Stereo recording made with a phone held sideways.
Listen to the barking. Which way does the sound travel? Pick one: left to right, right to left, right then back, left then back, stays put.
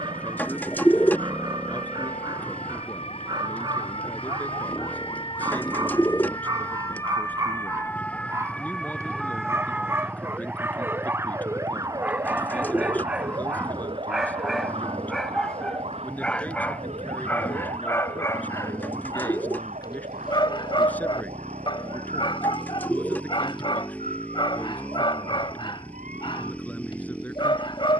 right to left.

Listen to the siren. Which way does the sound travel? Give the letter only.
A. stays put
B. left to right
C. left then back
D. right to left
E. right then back
B.